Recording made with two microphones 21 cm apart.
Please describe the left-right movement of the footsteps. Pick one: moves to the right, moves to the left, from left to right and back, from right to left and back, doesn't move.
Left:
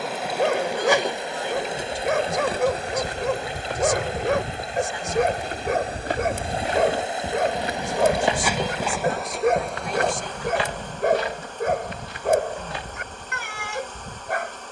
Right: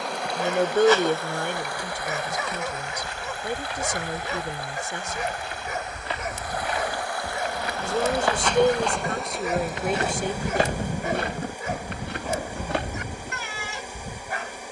moves to the right.